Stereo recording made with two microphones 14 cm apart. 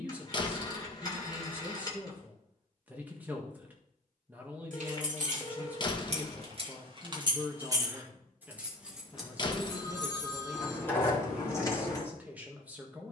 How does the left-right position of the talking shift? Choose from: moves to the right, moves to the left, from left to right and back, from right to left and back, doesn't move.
doesn't move.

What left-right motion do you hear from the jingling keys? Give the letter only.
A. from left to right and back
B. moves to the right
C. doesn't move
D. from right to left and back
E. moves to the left
E.